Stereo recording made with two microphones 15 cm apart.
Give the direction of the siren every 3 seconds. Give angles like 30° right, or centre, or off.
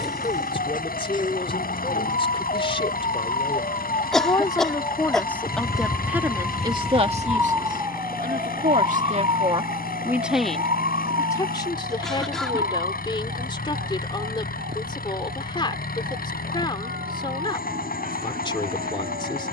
70° left, 40° left, 10° right, 50° right, 60° right, 70° right, 70° right.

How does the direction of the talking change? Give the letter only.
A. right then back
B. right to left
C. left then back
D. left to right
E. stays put
A.